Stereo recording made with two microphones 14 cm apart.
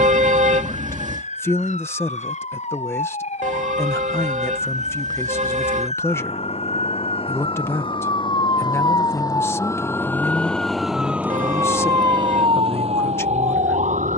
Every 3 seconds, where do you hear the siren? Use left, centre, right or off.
left, left, left, centre, right.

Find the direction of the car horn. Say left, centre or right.
right.